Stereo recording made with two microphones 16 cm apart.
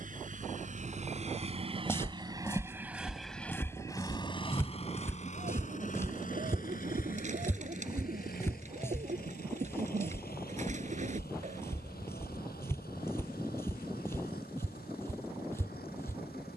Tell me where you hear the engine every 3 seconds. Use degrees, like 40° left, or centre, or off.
40° right, 30° left, 70° left, 80° left, 80° left, 80° left.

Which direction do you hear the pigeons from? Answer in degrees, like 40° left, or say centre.
50° right.